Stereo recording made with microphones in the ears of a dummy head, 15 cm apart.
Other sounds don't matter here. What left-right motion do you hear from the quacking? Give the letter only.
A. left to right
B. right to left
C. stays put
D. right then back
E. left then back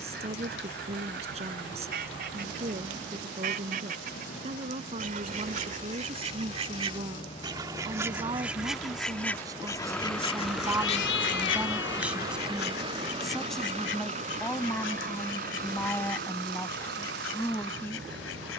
B.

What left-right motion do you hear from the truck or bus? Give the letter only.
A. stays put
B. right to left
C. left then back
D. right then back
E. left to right
E.